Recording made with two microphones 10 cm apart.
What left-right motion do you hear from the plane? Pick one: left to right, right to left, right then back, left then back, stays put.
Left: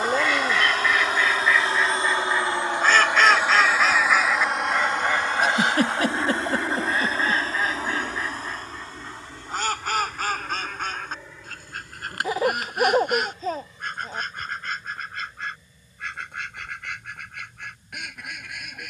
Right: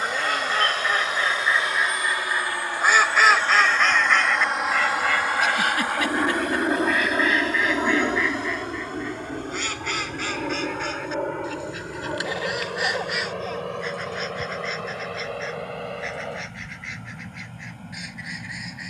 left to right.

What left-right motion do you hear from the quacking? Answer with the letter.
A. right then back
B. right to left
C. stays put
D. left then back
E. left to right
B.